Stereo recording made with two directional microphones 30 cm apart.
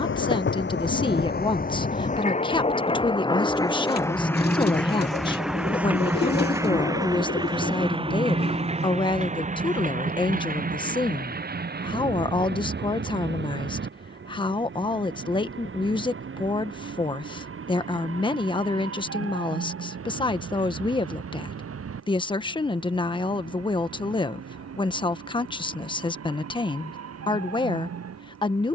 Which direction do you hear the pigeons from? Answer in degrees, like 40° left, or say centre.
30° left.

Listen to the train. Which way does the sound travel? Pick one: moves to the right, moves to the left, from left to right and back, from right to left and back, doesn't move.
moves to the right.